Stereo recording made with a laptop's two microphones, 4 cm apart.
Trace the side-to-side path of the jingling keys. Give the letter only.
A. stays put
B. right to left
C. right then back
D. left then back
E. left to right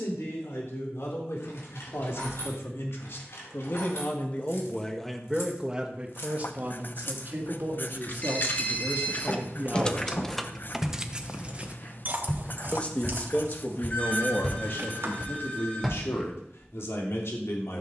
E.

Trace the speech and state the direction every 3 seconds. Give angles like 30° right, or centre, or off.
70° left, 20° left, 40° right, 40° right, 50° left, 70° left.